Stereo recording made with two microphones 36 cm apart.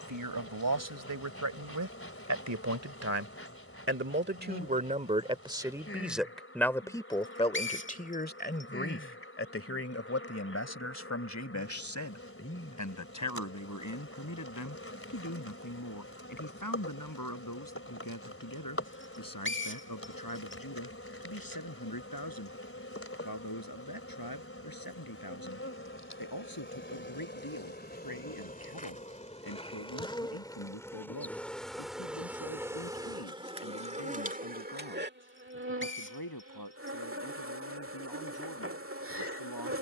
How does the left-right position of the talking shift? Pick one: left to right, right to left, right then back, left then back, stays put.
right to left.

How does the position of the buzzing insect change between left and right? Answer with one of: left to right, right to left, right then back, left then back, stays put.
left to right.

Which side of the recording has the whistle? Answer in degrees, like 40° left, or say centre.
30° left.